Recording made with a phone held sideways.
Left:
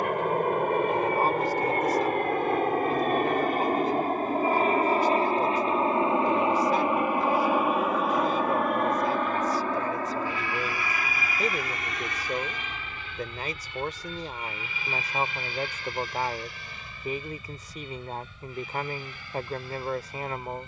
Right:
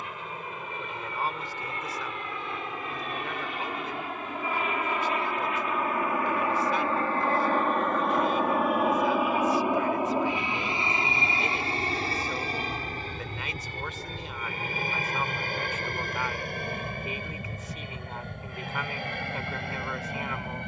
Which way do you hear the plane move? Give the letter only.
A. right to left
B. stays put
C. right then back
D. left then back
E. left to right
E.